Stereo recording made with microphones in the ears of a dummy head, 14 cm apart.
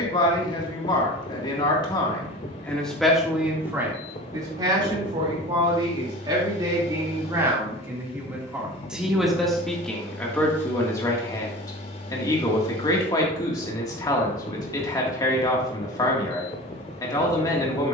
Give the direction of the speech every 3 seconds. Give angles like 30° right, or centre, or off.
20° left, 20° right, 20° right, 10° left, 20° left, 20° left.